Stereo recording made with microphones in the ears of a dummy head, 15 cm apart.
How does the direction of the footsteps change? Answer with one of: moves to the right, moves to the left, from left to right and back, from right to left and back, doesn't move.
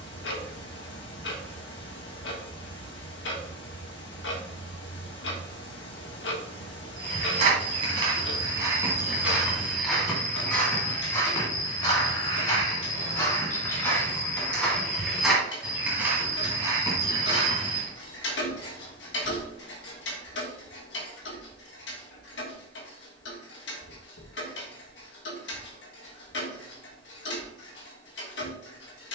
from right to left and back.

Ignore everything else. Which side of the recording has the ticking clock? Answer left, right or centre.
left.